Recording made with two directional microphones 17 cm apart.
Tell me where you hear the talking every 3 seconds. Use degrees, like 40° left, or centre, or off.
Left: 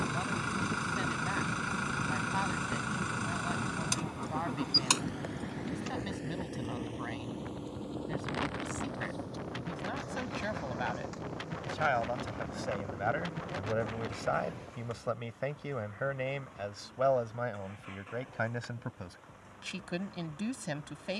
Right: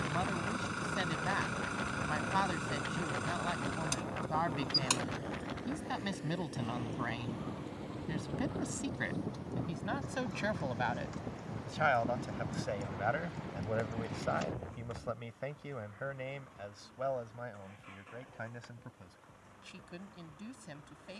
20° right, 20° right, 20° right, 10° right, 10° left, 40° left, 60° left.